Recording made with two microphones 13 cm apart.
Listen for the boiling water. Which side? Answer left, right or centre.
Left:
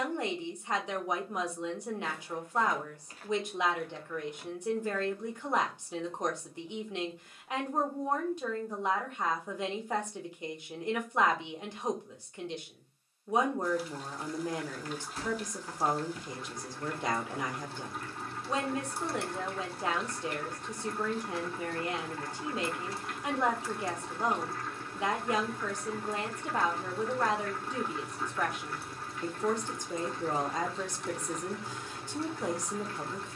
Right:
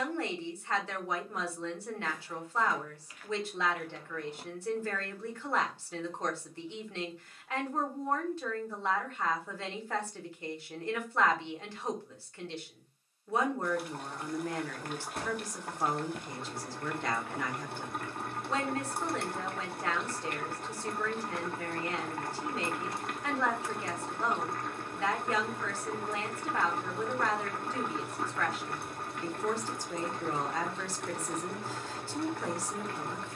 right.